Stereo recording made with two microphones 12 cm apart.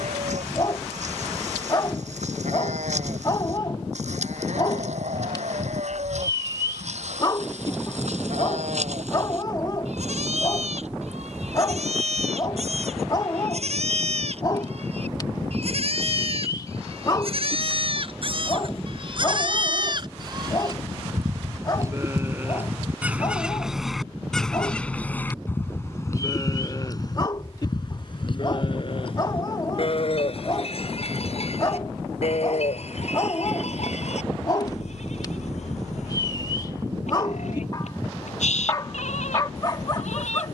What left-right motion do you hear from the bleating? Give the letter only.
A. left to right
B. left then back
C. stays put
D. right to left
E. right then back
D.